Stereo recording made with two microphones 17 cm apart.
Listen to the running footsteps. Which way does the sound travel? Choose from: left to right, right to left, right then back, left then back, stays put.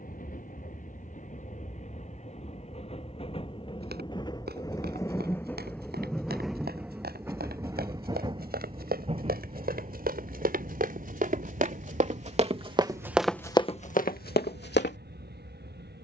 right to left.